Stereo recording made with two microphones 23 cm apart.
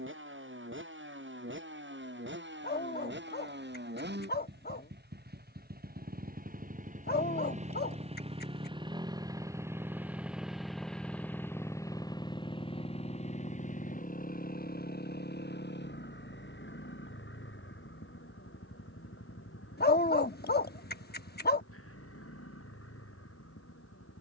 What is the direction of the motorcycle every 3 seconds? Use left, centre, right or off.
right, right, right, centre, left, left, left, left.